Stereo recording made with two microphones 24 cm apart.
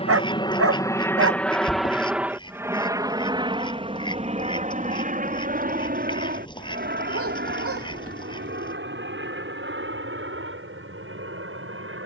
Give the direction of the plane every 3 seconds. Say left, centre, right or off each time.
centre, right, right, right.